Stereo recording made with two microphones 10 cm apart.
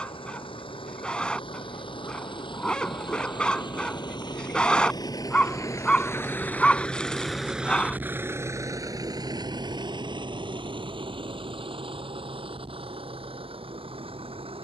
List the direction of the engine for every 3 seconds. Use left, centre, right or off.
left, left, centre, right, right.